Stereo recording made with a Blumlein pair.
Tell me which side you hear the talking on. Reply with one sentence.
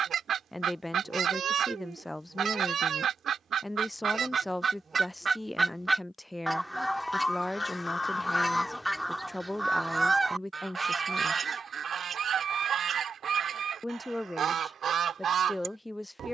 In this clip you hear the talking in the centre.